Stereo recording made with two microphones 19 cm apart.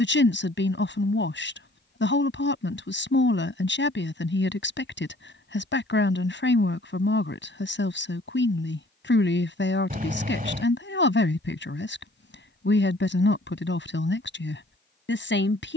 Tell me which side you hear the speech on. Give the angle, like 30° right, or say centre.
80° left.